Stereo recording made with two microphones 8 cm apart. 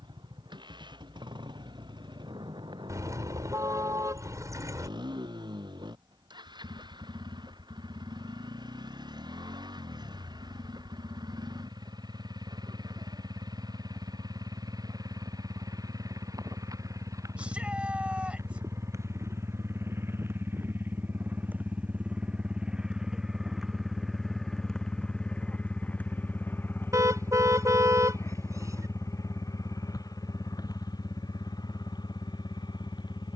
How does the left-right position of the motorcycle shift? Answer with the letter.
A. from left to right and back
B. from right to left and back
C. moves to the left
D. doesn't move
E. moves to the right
C.